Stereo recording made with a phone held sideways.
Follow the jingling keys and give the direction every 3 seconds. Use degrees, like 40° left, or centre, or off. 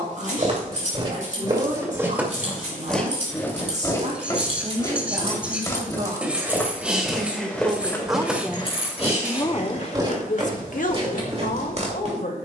60° right, 40° right, 10° left, 60° left.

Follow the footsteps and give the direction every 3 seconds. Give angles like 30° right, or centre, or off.
30° right, 20° left, 10° left, 30° right.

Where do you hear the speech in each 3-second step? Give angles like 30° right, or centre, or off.
60° right, 50° right, 30° right, 60° left.